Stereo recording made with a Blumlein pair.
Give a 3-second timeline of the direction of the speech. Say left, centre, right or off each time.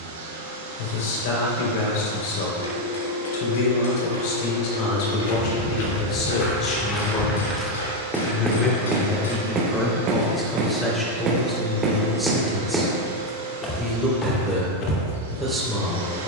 left, left, left, centre, centre, centre.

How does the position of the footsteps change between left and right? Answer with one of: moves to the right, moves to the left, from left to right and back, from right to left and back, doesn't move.
from left to right and back.